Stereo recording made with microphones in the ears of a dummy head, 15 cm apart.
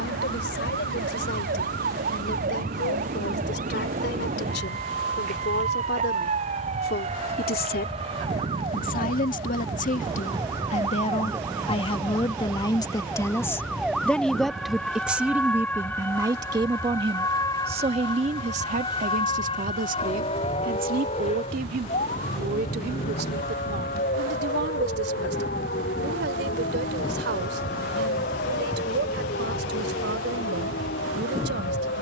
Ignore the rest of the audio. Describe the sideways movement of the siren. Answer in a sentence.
You can hear the siren travel towards the left.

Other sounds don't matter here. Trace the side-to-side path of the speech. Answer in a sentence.
You can hear the speech move to the right.